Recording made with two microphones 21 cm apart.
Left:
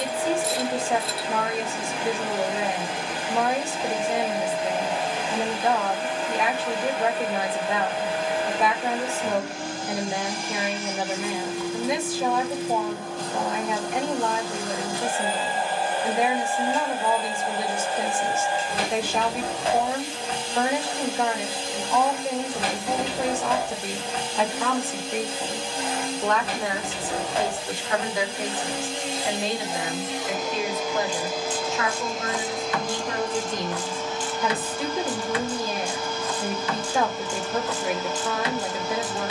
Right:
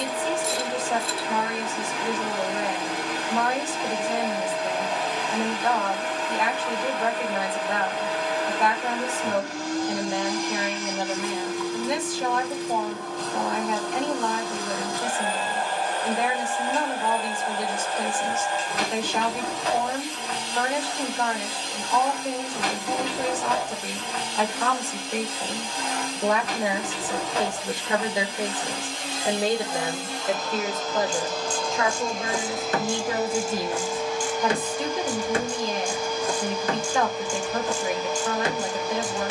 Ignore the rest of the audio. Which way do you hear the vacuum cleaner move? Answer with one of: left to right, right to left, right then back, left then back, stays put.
left to right.